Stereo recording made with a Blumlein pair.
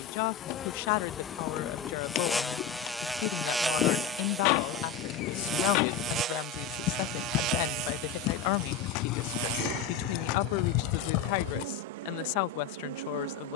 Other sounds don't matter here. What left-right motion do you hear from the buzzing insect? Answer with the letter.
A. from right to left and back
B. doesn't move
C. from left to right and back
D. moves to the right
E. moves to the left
D.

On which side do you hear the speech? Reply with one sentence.
You can hear the speech on the left.